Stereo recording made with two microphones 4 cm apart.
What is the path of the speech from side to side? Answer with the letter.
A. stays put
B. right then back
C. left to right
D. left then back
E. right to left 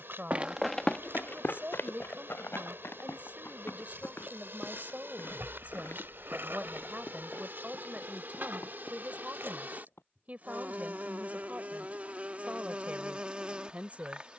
A.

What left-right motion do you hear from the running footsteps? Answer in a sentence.
In this clip you hear the running footsteps travel towards the left.